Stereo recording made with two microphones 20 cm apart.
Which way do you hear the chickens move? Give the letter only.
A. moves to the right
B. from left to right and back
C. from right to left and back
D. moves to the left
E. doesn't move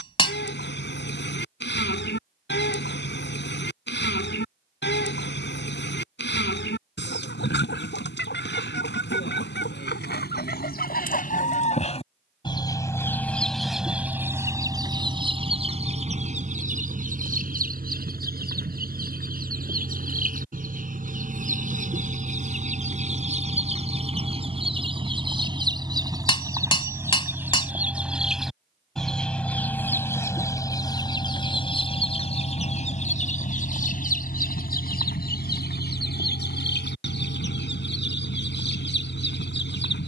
B.